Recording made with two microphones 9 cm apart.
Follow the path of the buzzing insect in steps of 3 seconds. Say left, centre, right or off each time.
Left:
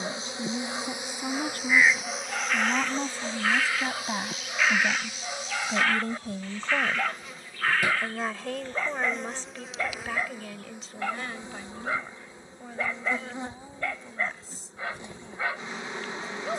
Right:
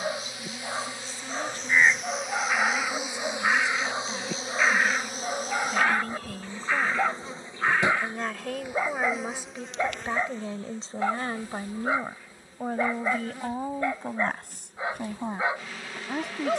centre, right, right, centre, left, left.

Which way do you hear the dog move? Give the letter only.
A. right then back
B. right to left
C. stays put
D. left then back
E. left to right
C.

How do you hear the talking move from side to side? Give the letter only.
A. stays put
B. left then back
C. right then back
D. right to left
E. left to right
E.